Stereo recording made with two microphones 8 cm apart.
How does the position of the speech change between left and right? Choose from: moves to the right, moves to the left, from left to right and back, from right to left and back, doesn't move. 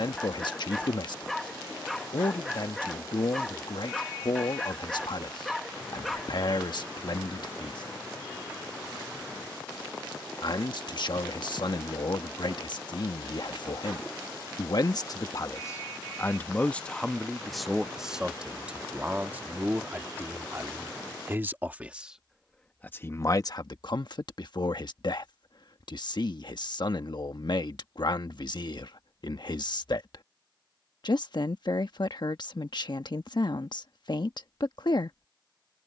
from left to right and back.